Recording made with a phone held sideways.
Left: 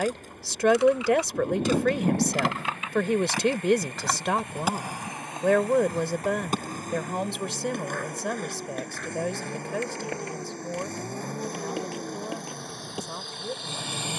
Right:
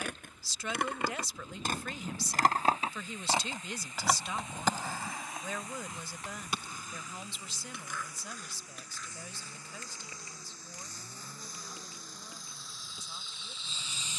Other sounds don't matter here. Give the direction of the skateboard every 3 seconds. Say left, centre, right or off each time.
right, centre, left, left, left.